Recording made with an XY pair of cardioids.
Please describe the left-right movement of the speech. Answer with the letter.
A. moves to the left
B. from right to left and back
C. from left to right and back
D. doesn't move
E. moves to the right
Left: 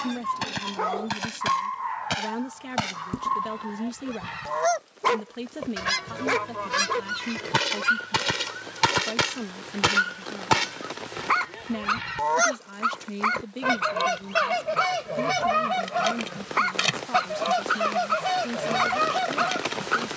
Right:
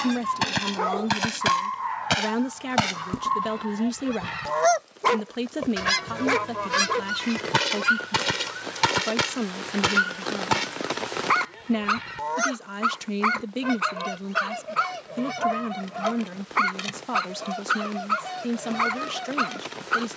D.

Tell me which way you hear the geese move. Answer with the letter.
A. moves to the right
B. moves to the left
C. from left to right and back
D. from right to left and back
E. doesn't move
B.